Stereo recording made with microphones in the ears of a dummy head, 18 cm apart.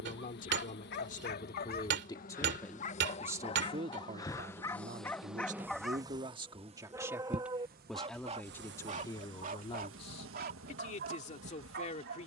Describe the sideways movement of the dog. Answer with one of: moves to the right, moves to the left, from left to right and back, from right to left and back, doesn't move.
moves to the right.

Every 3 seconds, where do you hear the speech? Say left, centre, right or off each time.
left, right, centre, left.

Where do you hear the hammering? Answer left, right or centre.
right.